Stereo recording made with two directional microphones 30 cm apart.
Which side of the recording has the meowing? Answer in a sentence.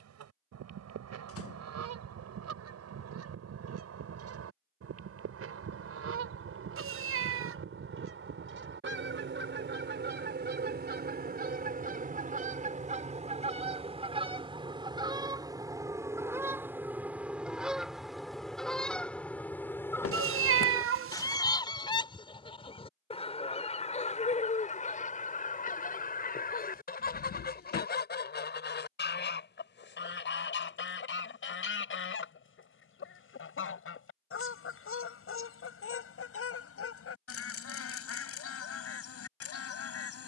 You can hear the meowing on the right.